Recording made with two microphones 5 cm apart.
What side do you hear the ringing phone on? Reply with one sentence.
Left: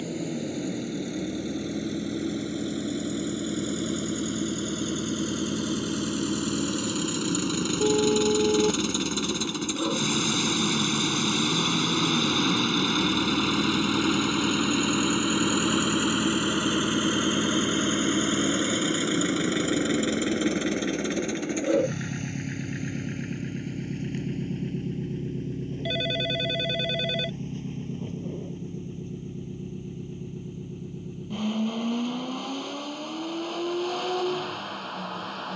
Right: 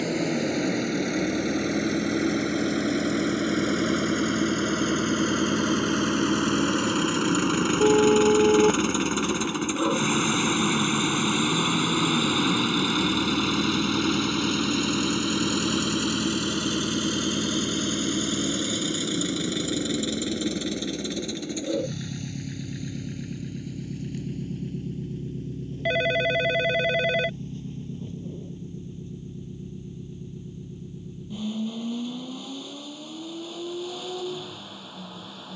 In this clip you hear the ringing phone on the right.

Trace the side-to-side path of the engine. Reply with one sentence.
In this clip you hear the engine move to the left.